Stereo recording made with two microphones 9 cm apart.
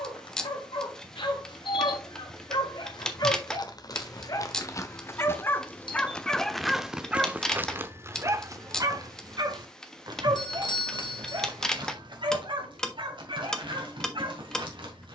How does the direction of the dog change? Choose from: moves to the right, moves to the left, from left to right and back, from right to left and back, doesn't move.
moves to the right.